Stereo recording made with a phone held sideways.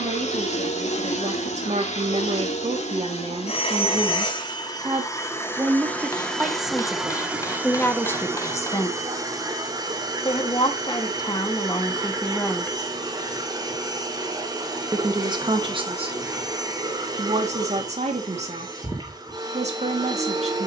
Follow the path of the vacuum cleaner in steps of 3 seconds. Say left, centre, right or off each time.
left, left, centre, right, right, right, right.